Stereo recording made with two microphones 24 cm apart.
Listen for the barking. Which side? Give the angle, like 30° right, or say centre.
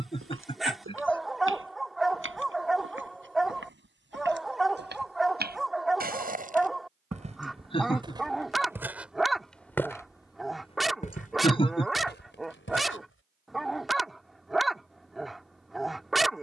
centre.